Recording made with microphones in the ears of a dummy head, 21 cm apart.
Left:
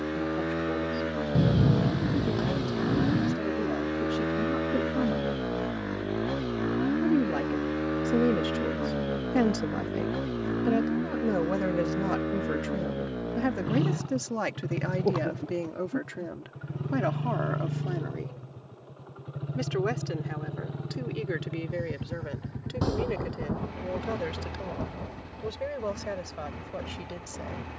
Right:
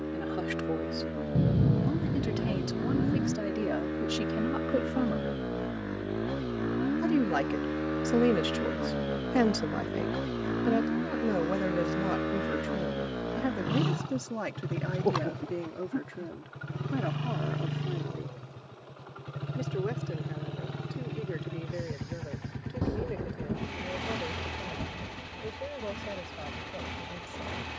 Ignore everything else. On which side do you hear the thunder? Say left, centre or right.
left.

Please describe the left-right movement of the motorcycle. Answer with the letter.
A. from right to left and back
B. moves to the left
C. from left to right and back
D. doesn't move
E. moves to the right
E.